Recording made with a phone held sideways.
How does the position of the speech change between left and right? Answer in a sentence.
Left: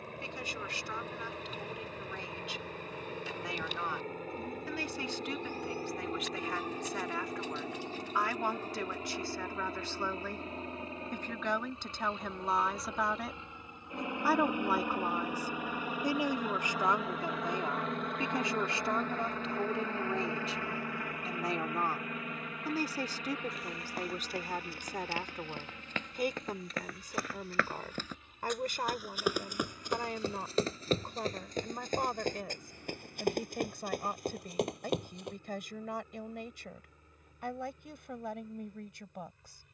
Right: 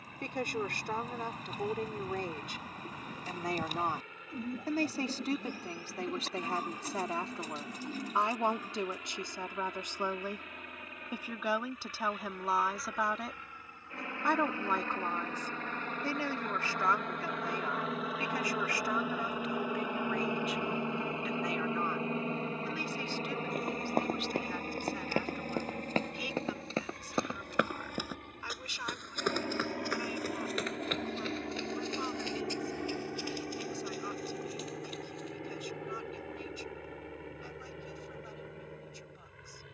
In this clip you hear the speech travel towards the left.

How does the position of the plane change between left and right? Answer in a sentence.
In this clip you hear the plane move to the right.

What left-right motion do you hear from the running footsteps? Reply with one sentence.
You can hear the running footsteps move to the left.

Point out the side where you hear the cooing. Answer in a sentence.
In this clip you hear the cooing on the right.